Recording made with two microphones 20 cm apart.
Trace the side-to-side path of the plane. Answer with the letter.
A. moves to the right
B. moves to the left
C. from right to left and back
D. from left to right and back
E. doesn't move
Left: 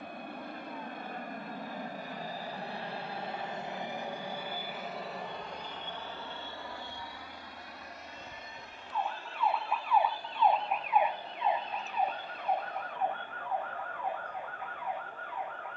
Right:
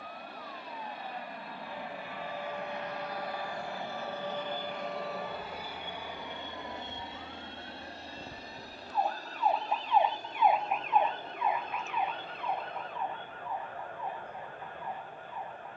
A.